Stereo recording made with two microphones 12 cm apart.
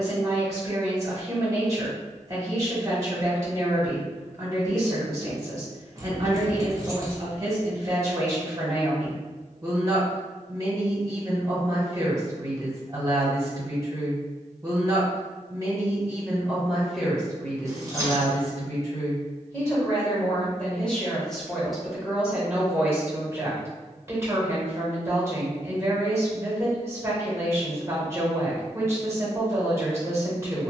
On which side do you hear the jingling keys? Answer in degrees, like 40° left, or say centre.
30° right.